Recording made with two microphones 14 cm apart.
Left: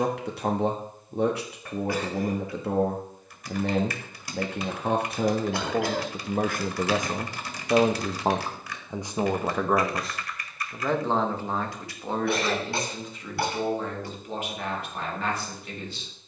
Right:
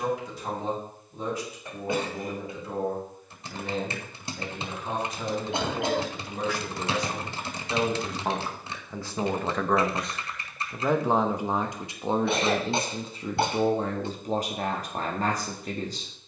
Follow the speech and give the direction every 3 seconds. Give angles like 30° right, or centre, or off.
70° left, 70° left, 40° left, centre, 30° right, 40° right.